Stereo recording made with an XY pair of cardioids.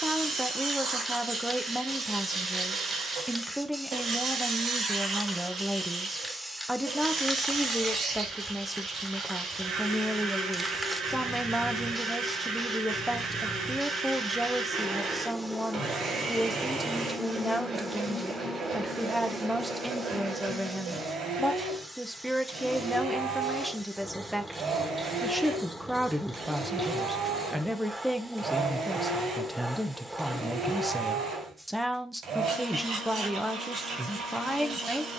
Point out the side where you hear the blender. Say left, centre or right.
right.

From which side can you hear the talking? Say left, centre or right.
centre.